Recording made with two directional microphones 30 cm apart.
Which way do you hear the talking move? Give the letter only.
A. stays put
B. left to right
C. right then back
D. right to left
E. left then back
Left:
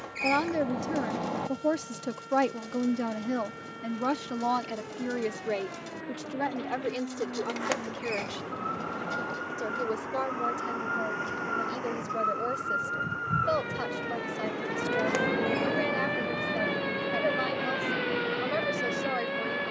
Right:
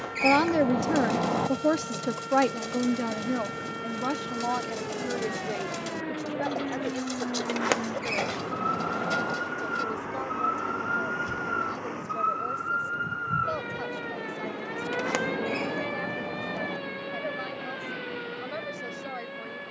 D.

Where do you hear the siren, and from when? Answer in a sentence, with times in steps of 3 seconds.
You can hear the siren on the right from 0 s, in the centre from 12 s and on the left from 15 s.